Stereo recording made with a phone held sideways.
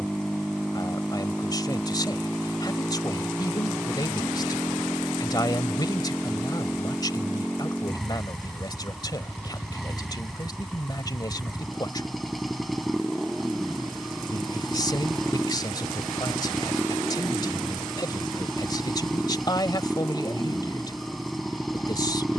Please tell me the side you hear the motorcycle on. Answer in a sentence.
In this clip you hear the motorcycle in the centre.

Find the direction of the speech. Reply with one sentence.
You can hear the speech on the left.